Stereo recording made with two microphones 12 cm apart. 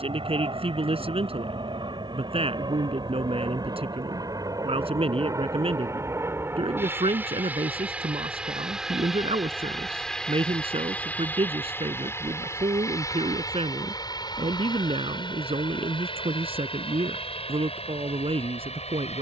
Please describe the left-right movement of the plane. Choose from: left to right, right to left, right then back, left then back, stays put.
right to left.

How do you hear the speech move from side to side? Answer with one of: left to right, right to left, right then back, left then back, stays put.
stays put.